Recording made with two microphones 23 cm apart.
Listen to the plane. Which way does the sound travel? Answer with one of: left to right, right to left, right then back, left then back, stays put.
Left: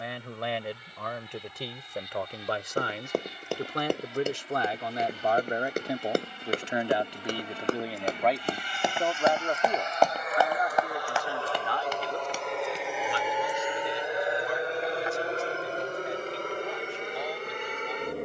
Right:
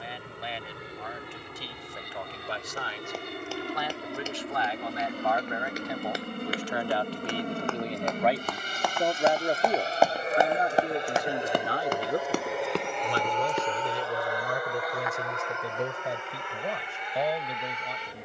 right to left.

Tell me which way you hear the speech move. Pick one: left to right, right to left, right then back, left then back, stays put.
left to right.